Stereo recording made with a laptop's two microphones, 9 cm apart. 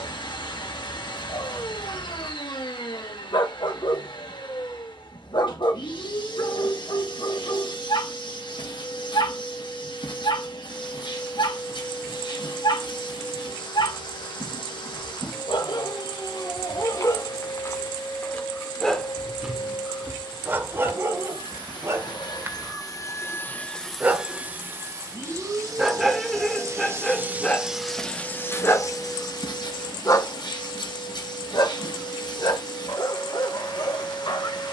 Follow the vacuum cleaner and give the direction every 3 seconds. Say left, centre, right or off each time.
left, left, left, left, left, left, left, left, right, left, left, left.